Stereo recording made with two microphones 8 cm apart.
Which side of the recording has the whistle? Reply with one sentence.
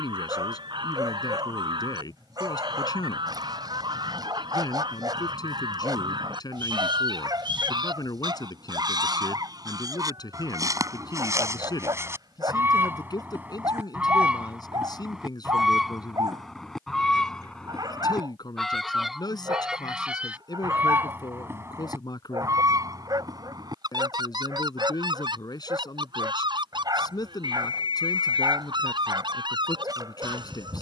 In this clip you hear the whistle on the right.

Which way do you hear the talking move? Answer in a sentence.
You can hear the talking stay put.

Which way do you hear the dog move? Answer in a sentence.
You can hear the dog stay put.